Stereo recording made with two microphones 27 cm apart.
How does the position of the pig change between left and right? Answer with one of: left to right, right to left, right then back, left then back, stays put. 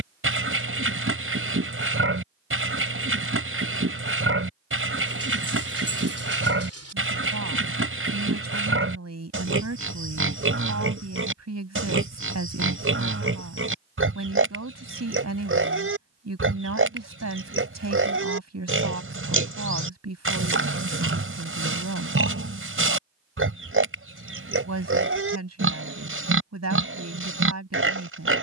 stays put.